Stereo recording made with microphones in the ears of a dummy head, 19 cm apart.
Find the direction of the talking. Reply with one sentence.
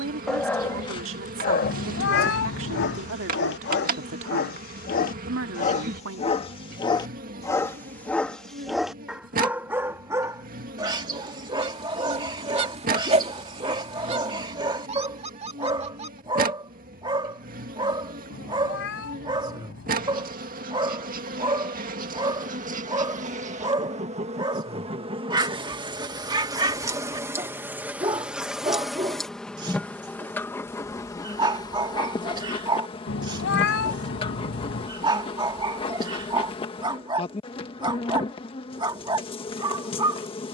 In this clip you hear the talking on the right.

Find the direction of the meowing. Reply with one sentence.
In this clip you hear the meowing on the left.